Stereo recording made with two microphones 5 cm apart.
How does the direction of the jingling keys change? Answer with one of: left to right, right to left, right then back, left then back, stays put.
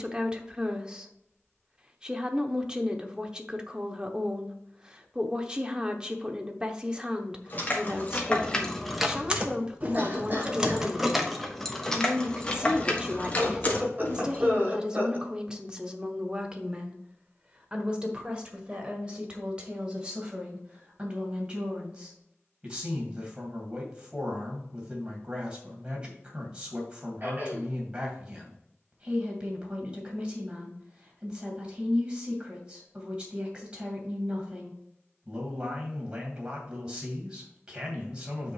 right then back.